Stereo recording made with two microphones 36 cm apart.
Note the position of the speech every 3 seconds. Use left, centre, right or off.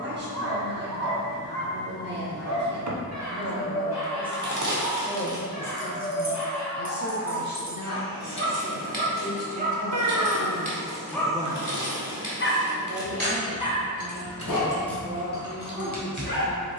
right, centre, left, left, right, right.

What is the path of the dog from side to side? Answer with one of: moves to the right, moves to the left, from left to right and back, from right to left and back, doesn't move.
moves to the left.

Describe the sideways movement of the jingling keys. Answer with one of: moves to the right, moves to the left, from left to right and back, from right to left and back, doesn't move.
from right to left and back.